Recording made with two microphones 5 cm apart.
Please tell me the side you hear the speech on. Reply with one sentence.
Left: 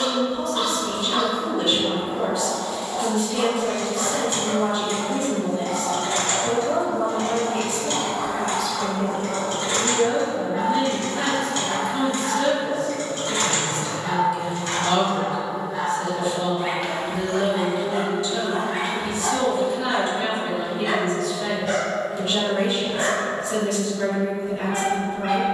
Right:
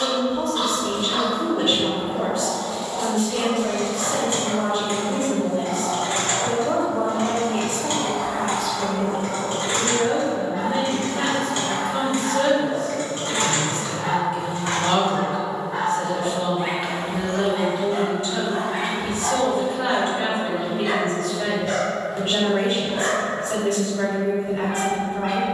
You can hear the speech on the right.